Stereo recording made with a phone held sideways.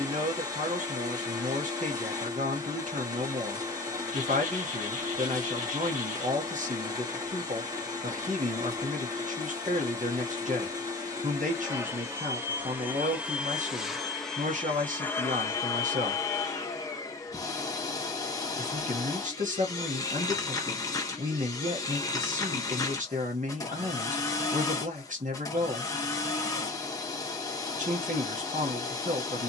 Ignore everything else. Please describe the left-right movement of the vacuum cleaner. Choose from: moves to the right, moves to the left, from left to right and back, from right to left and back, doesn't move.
moves to the left.